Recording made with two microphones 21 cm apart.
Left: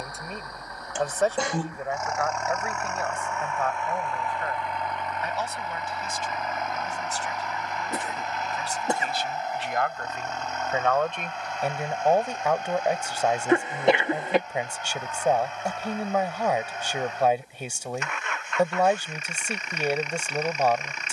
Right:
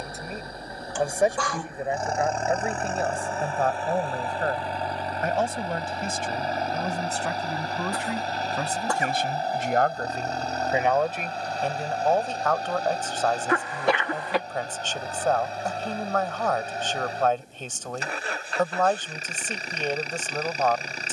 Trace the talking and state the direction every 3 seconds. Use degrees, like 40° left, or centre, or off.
20° right, 50° right, 60° right, 30° right, 10° left, 10° left, 10° left.